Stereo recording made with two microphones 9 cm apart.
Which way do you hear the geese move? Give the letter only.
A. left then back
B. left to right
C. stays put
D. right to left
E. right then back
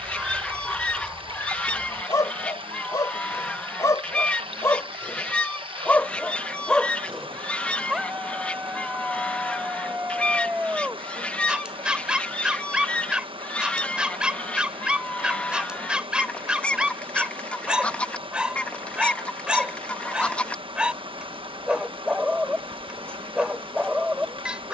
C.